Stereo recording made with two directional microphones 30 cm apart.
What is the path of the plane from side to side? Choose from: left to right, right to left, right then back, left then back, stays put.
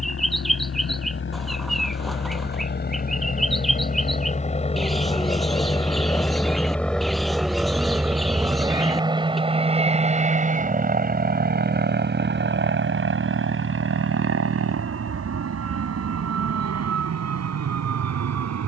left to right.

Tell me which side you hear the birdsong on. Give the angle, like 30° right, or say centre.
centre.